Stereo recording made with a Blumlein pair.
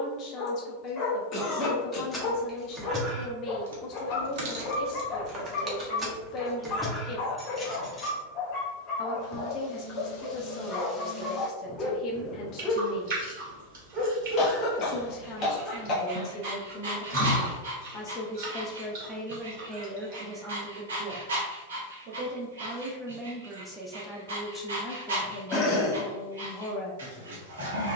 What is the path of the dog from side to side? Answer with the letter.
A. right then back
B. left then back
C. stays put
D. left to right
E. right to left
D.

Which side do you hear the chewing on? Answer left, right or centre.
right.